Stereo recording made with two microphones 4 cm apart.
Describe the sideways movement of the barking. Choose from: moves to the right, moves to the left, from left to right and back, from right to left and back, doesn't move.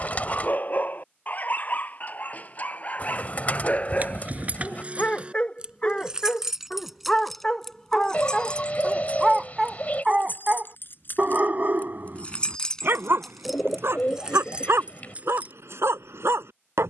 moves to the right.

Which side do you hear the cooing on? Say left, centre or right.
left.